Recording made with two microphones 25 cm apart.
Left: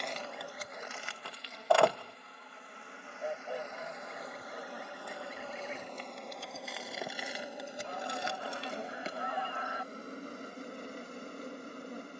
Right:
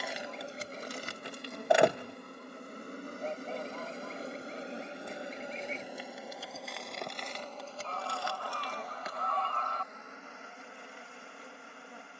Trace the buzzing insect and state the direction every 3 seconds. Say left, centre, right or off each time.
right, right, centre, left.